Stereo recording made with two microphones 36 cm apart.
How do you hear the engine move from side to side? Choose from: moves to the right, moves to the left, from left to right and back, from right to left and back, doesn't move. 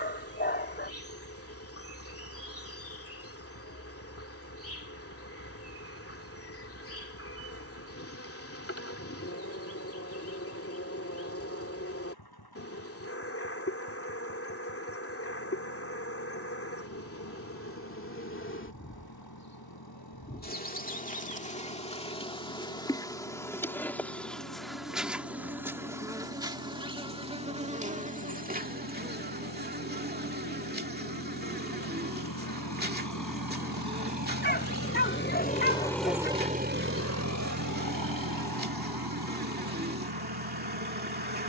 moves to the right.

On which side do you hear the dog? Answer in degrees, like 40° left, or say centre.
30° left.